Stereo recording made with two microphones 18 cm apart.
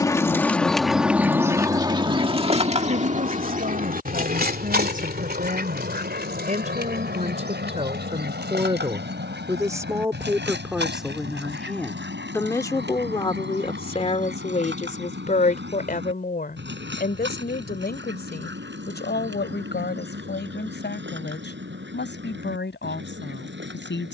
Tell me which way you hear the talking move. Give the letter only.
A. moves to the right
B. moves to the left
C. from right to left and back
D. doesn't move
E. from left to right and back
B.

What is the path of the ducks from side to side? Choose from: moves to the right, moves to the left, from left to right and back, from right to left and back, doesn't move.
moves to the right.